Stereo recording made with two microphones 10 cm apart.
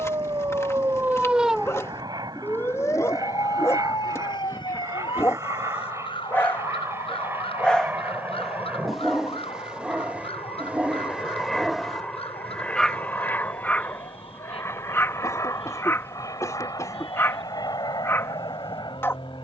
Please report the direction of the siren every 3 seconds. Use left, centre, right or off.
centre, left, left, left, left, left, left.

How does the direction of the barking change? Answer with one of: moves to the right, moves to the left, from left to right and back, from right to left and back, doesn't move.
from left to right and back.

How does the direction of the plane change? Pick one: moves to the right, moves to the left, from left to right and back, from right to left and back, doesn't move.
moves to the left.